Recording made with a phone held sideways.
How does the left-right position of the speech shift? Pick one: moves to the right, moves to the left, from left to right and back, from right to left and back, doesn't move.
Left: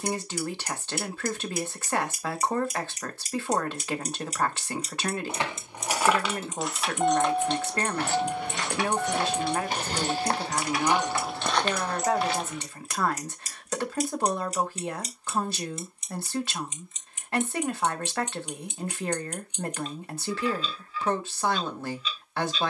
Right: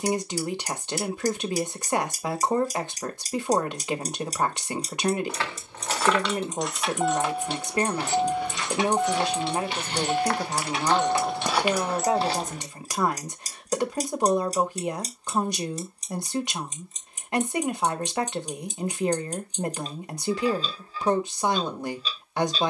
doesn't move.